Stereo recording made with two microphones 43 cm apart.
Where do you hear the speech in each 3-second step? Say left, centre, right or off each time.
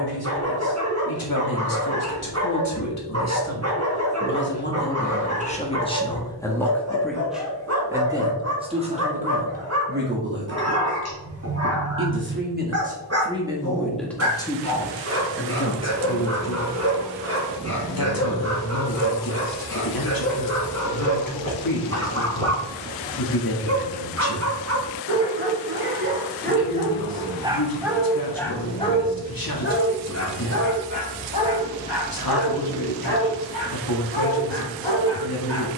left, left, centre, right, centre, left, left, left, left, left, left, left.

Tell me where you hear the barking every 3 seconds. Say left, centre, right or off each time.
right, right, right, right, right, right, right, right, right, centre, left, left.